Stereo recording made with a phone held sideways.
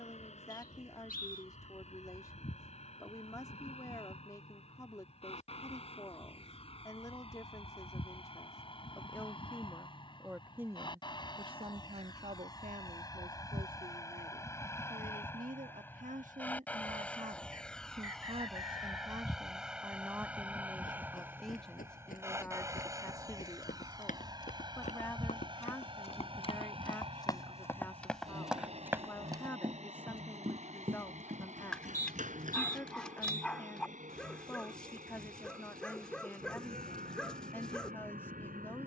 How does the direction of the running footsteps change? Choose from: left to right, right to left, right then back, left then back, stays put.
left to right.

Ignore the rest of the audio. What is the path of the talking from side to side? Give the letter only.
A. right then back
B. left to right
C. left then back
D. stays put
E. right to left
A.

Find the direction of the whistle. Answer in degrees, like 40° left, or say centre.
80° left.